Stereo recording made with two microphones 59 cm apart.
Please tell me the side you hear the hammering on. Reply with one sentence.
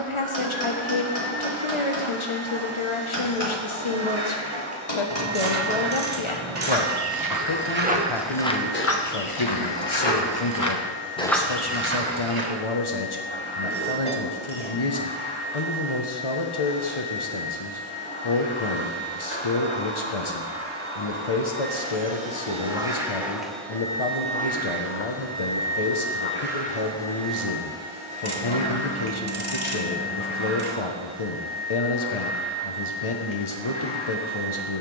In this clip you hear the hammering on the left.